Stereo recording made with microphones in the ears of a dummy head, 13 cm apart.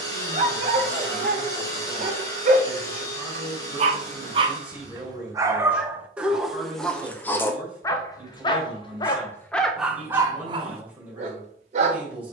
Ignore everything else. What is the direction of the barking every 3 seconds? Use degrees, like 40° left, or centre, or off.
50° right, 30° right, 10° left, 20° right.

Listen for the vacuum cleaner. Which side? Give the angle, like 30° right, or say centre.
20° left.